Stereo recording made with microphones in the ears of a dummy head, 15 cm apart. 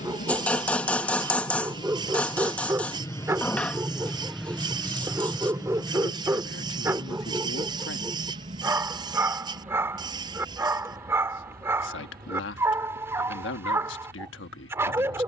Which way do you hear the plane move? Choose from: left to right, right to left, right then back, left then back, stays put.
left to right.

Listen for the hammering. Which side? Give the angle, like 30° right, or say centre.
10° left.